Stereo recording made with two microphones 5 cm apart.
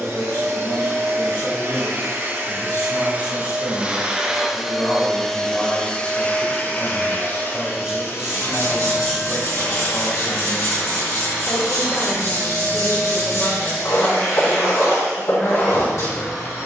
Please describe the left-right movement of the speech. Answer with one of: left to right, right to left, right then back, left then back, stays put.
right then back.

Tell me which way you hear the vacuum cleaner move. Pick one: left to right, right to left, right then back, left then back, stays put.
right to left.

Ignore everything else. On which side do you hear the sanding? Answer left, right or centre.
left.